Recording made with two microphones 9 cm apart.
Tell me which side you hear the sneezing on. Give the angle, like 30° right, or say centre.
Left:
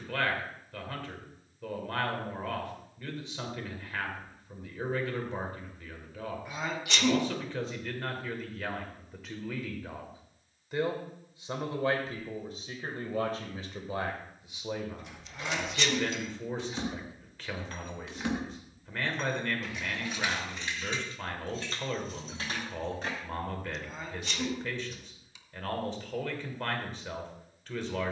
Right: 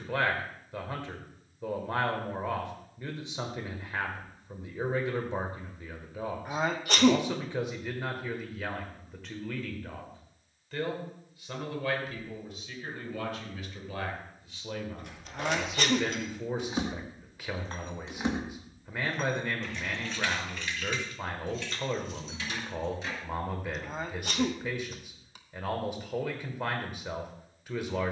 40° right.